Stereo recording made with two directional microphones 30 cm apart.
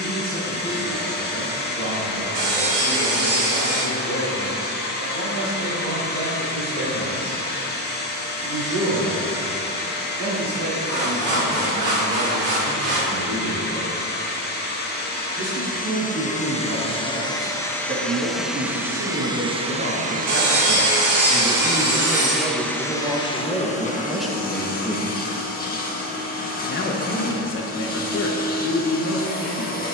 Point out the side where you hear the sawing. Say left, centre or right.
right.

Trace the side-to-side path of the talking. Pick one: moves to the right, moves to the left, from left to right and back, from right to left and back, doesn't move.
moves to the left.